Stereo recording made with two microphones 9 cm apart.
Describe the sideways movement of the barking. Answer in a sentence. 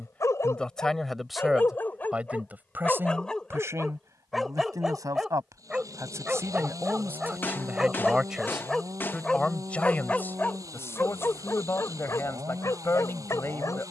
In this clip you hear the barking move from left to right and back again.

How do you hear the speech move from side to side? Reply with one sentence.
In this clip you hear the speech move from left to right and back again.